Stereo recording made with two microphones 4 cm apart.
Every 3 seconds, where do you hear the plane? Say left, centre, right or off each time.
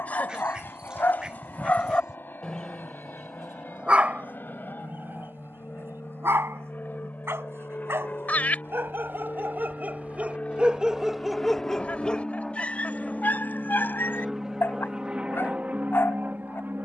left, left, left, left, centre, right.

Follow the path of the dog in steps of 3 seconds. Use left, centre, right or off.
left, right, right, right, left, left.